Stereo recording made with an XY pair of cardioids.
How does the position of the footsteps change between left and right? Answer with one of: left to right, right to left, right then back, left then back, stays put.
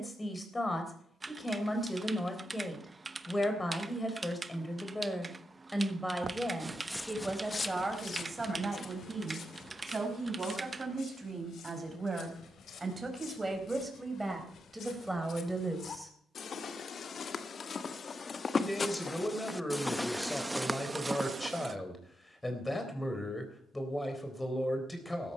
left then back.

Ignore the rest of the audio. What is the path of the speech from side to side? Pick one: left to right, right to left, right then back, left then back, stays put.
right then back.